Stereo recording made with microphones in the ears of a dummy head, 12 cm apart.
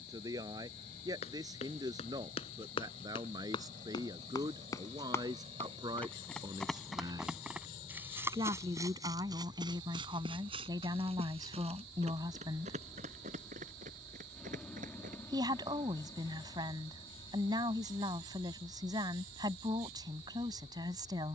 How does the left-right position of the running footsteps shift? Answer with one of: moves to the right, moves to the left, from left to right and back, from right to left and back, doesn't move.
moves to the right.